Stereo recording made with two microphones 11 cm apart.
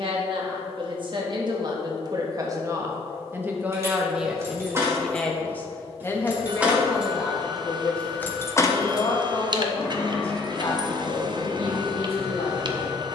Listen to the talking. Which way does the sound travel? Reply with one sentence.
You can hear the talking travel towards the left.